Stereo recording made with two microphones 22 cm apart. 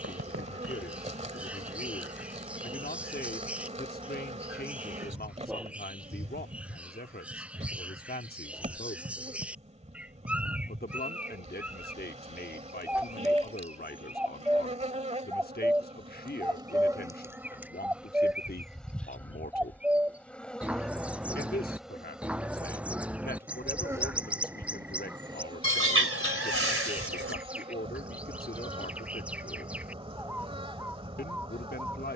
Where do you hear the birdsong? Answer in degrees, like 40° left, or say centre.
10° right.